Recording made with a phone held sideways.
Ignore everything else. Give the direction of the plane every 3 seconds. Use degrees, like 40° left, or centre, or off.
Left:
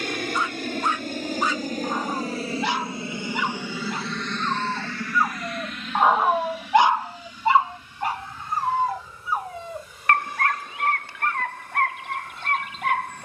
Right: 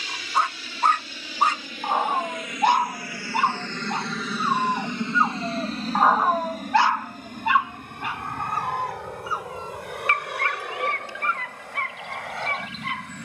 50° left, 10° right, 50° right, 70° right, 70° right.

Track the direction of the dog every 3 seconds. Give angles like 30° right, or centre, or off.
60° right, 30° right, 30° left, 60° left, 70° left.